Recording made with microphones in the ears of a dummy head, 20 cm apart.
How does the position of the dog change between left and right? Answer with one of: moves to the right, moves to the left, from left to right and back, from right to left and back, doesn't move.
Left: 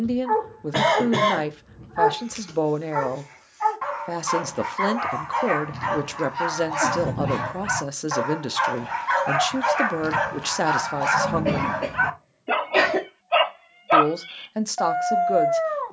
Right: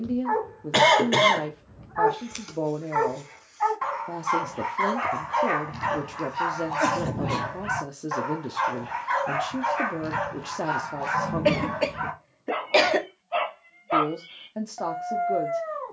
moves to the left.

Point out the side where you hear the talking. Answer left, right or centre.
left.